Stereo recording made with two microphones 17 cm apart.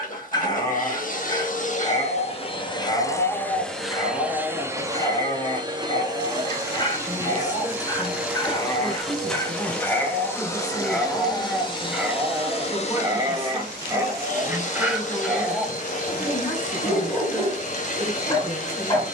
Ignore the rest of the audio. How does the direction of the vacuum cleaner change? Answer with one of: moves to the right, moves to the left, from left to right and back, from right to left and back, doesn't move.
from left to right and back.